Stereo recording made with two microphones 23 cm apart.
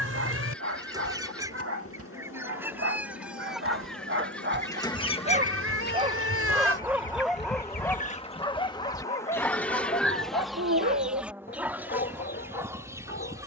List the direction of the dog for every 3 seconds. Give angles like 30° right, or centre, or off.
70° right, 50° right, centre, 40° left, 50° left.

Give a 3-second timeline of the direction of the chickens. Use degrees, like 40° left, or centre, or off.
10° right, 10° left, 40° left, centre, 10° right.